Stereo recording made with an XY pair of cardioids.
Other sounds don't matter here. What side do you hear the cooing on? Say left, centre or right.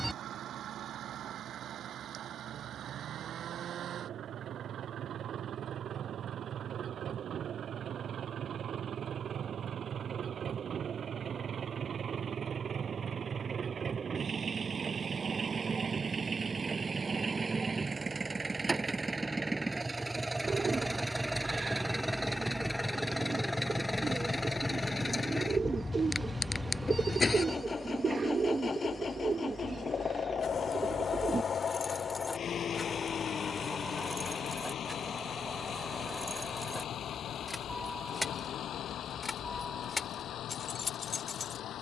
right.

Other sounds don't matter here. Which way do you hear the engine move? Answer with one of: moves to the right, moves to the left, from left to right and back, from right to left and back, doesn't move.
moves to the left.